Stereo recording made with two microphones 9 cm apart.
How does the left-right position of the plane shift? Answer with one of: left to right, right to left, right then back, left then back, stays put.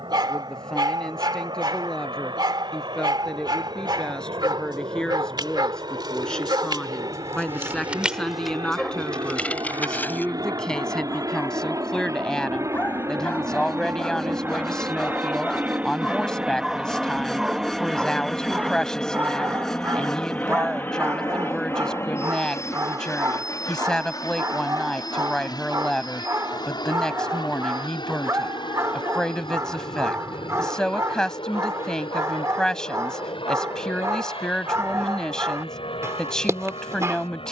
right to left.